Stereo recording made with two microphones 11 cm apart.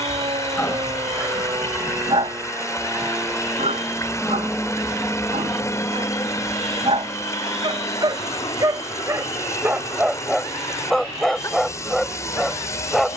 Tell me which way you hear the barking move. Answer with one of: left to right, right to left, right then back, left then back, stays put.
right then back.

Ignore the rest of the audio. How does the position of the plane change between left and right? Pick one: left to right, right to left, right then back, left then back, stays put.
right to left.